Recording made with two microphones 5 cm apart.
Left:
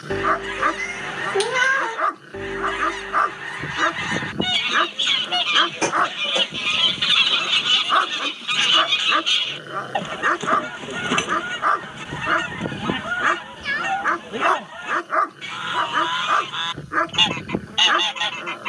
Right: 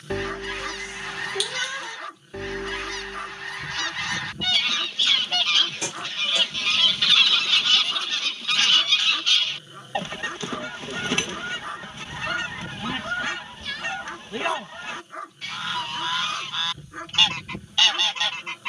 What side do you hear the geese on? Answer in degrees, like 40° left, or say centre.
10° left.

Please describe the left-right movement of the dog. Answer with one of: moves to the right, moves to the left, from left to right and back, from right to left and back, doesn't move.
doesn't move.